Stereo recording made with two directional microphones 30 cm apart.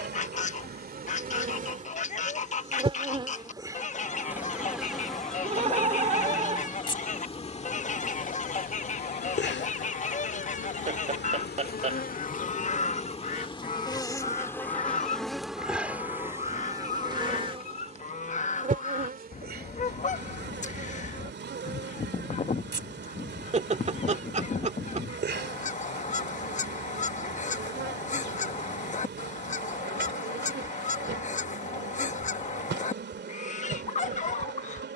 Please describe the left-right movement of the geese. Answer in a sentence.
In this clip you hear the geese stay in one place.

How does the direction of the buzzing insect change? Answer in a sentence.
You can hear the buzzing insect move from right to left and back again.